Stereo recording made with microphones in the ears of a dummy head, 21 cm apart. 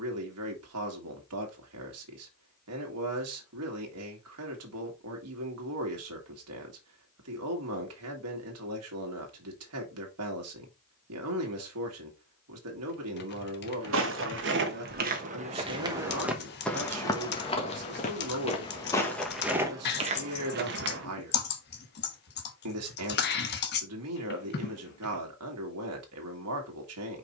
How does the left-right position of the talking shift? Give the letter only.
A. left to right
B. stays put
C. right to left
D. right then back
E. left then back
B.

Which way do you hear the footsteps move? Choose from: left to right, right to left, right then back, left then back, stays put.
left then back.